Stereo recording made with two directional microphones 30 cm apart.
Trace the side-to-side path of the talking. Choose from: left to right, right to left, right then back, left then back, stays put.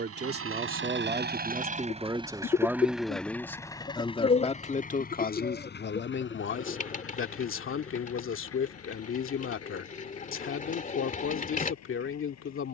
right to left.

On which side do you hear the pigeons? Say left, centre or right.
left.